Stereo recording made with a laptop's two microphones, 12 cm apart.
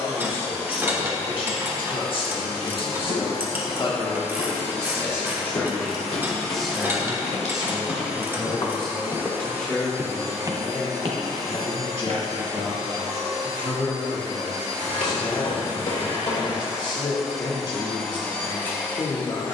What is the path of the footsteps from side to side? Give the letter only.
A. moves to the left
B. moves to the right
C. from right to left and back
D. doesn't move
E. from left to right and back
B.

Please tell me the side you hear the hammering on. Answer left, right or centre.
left.